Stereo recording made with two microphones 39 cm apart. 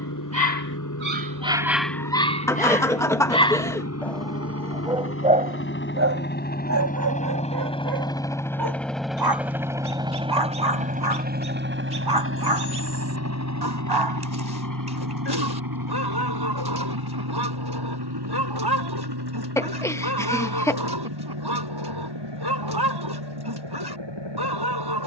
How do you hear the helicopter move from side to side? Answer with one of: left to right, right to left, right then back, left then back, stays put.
left to right.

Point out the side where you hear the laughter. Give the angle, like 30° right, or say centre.
10° left.